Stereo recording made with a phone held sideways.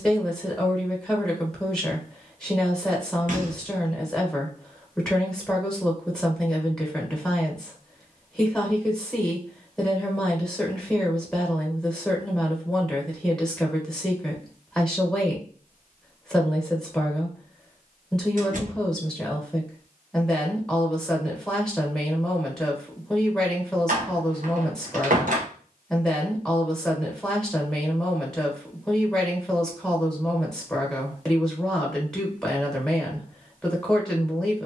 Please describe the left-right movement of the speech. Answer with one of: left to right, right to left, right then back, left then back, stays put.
stays put.